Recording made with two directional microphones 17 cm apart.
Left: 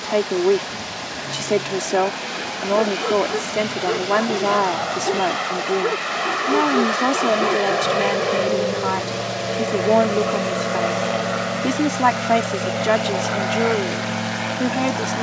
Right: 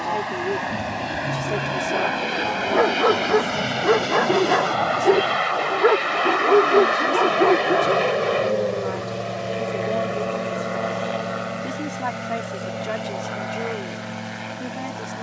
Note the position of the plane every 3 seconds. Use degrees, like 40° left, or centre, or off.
40° right, 20° right, centre, 20° left, 40° left.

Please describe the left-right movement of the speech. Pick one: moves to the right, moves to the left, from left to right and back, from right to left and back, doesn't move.
doesn't move.